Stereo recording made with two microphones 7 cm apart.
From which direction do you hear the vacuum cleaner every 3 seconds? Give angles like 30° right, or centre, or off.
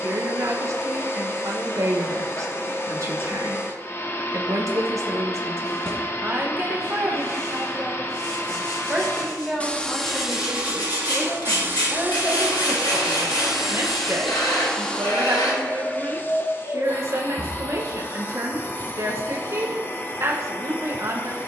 30° left, 30° left, 30° left, 10° right, 10° right, 30° left, 30° left.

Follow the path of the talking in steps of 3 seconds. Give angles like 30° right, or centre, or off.
40° right, 40° right, 20° right, centre, 30° right, 40° right, 40° right.